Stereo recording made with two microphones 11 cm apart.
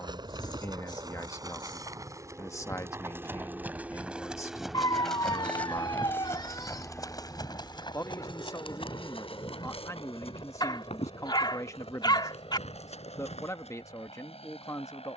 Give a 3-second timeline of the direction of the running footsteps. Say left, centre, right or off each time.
right, centre, left, left, left.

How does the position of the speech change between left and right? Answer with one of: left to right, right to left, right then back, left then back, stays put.
stays put.